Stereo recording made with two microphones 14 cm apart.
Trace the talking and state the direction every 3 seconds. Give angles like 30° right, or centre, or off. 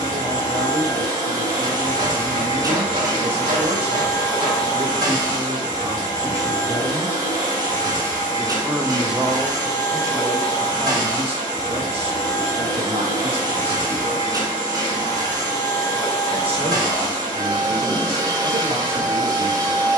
40° right, 40° right, 10° right, 30° right, 40° right, 40° right, 40° right.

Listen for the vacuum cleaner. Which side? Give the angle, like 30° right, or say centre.
30° right.